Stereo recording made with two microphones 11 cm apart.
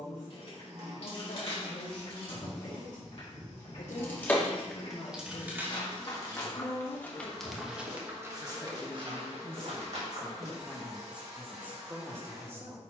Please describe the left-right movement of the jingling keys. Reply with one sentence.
In this clip you hear the jingling keys travel towards the right.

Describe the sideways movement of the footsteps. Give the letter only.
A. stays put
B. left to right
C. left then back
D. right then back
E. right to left
B.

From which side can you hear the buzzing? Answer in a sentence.
In this clip you hear the buzzing on the right.